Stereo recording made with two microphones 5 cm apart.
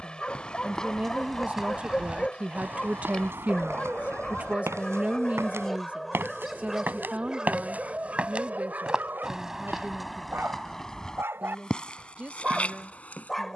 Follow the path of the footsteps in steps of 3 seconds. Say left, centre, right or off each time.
centre, right, right, centre, left.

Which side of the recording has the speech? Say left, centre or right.
right.